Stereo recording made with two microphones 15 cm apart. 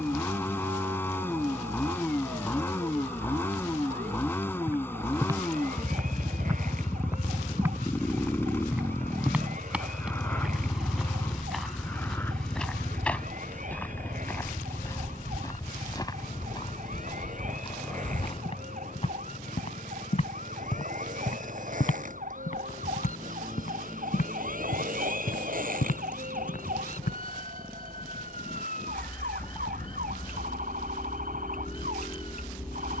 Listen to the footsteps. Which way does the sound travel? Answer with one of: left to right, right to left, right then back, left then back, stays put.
right to left.